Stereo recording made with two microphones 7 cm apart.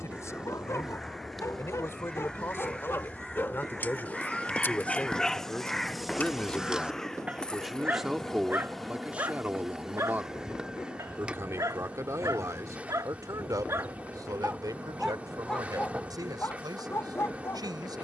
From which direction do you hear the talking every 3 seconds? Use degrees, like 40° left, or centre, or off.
40° left, 20° left, centre, 30° right, 60° right, 70° right.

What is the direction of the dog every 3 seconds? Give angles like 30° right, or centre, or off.
40° left, 20° left, 20° right, 50° right, 40° right, 30° left.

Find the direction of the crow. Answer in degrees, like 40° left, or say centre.
10° left.